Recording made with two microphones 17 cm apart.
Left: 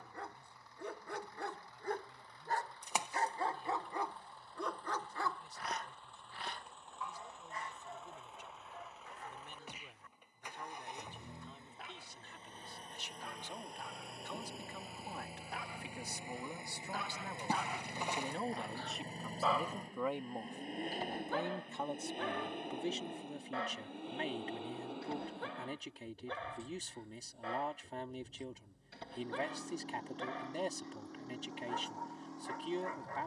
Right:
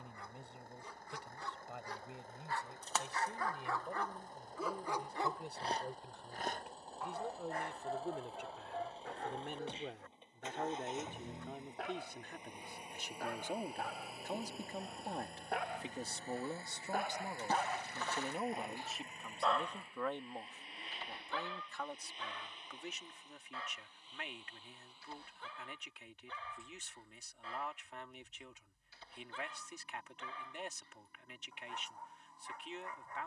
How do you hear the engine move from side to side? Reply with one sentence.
You can hear the engine move from right to left.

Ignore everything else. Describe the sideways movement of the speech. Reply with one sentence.
In this clip you hear the speech travel towards the left.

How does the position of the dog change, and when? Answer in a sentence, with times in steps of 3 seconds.
You can hear the dog on the left from 0 s, in the centre from 3 s, on the right from 6 s, in the centre from 18 s and on the left from 21 s.